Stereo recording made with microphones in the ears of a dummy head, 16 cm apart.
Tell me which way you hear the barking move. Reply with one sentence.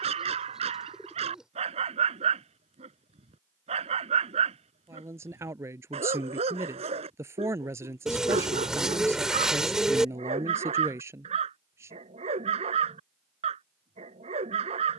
In this clip you hear the barking stay in one place.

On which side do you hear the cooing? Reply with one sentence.
You can hear the cooing in the centre.